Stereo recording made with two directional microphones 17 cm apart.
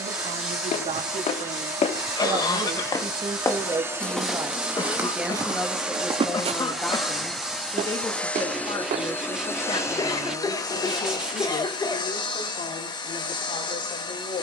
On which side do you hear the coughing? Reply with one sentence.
You can hear the coughing on the left.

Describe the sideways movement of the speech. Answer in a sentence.
In this clip you hear the speech move to the left.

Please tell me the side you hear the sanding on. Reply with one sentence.
In this clip you hear the sanding in the centre.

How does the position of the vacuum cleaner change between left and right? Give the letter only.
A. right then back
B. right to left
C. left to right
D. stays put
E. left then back
B.